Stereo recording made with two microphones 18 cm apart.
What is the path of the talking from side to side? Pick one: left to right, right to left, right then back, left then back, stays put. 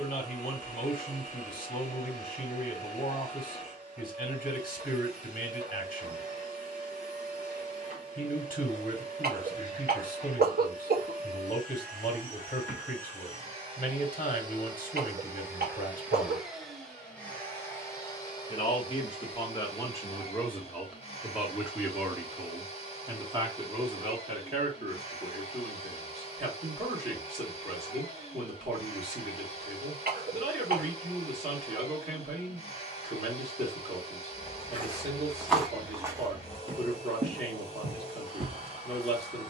left to right.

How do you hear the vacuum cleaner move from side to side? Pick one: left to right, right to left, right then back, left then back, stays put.
right to left.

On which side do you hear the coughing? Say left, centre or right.
right.